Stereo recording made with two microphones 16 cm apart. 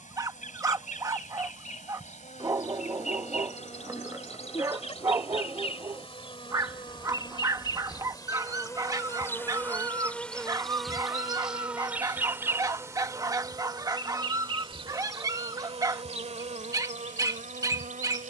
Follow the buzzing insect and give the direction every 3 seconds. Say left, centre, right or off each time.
left, left, left, centre, right, right.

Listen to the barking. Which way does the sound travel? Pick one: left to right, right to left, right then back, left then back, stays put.
stays put.